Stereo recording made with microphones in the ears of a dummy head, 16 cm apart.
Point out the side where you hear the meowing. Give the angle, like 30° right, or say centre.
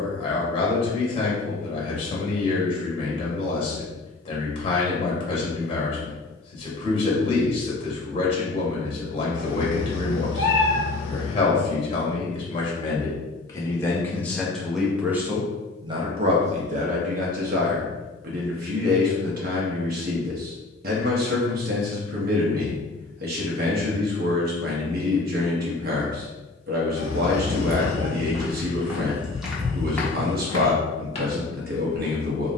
70° left.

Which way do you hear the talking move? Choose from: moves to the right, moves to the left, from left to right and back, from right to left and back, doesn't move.
moves to the right.